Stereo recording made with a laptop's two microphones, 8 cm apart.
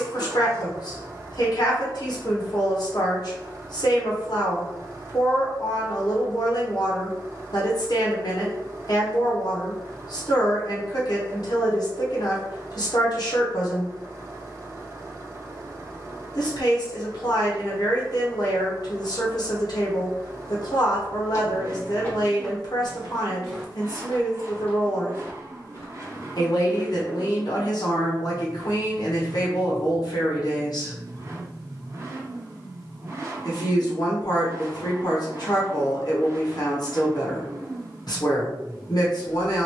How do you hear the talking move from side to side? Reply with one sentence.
You can hear the talking stay in one place.